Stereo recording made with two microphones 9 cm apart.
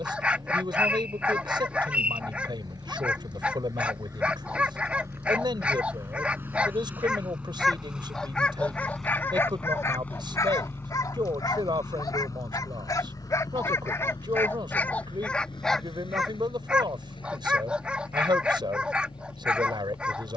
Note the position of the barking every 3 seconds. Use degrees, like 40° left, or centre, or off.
10° right, 10° right, centre, 40° left, 30° left, centre, 10° right.